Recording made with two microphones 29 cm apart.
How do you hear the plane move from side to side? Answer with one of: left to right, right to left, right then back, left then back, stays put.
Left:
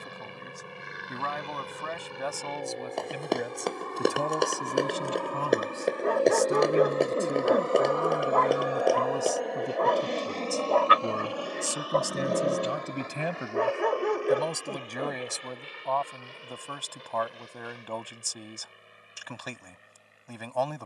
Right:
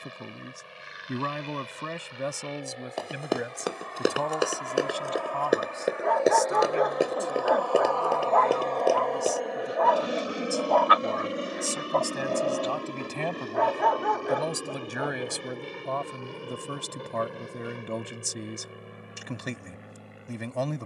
left to right.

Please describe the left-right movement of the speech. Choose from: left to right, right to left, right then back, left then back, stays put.
left then back.